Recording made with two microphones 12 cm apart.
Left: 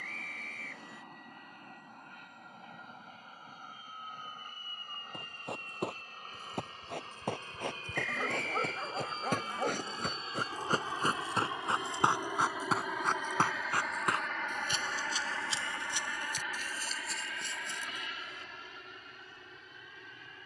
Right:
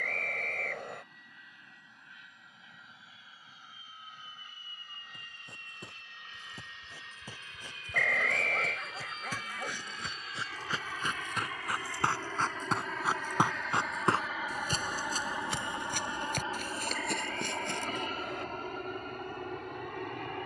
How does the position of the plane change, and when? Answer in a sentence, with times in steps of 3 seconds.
In this clip you hear the plane on the left from 0 s, in the centre from 12 s and on the right from 15 s.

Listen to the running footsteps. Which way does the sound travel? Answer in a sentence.
In this clip you hear the running footsteps move from left to right.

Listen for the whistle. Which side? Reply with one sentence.
In this clip you hear the whistle on the right.